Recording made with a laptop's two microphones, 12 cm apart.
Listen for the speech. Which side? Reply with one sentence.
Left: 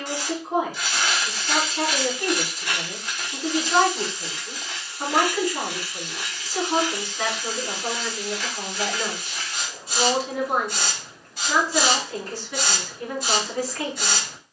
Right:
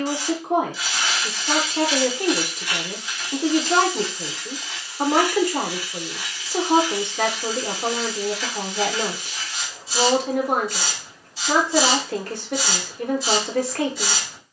You can hear the speech on the right.